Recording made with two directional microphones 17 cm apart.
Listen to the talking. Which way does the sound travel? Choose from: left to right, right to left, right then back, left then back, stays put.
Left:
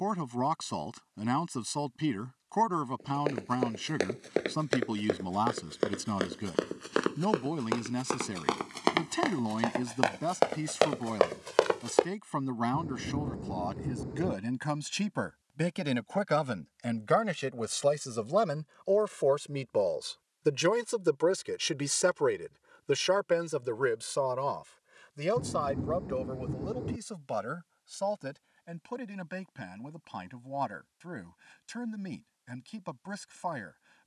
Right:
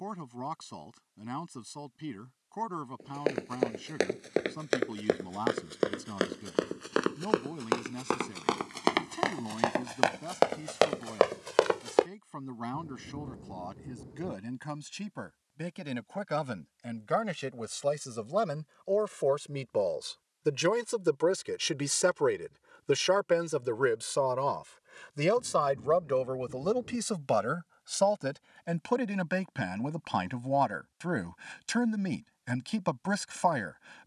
left to right.